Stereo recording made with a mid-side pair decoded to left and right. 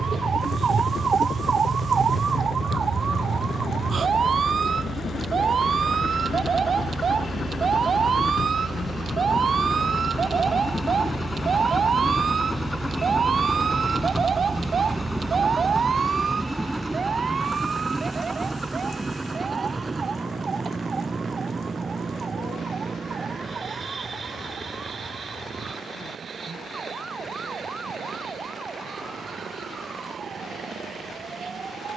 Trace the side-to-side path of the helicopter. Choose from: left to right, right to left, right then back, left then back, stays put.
left to right.